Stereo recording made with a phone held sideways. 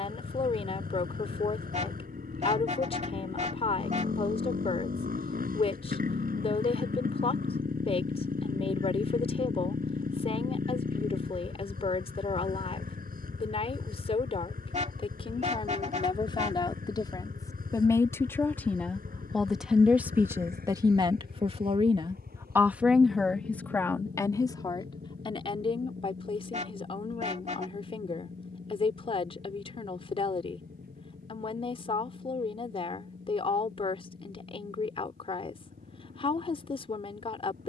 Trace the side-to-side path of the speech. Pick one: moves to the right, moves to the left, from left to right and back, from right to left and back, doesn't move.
from left to right and back.